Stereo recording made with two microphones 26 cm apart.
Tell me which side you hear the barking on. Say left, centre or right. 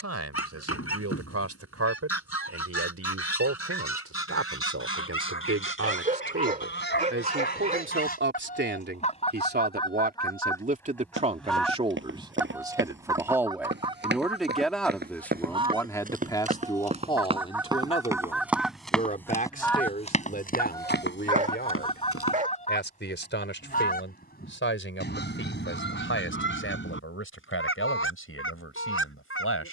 right.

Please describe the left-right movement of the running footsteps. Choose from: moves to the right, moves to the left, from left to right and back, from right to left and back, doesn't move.
moves to the left.